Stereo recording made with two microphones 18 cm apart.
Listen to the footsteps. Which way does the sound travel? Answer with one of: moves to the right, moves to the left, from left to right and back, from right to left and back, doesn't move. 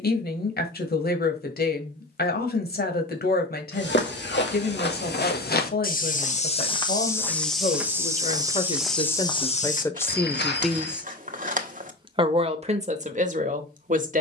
from left to right and back.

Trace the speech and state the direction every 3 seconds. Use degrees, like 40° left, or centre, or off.
60° left, 60° left, 50° left, 10° left, 40° right.